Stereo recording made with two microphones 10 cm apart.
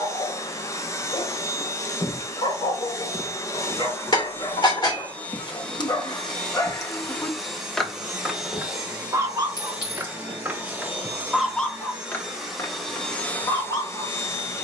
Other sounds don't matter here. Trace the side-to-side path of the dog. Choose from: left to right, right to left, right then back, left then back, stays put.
right then back.